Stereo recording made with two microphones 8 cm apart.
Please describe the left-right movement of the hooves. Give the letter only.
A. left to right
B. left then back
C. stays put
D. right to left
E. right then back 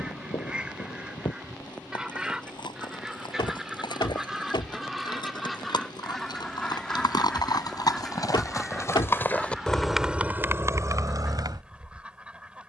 A.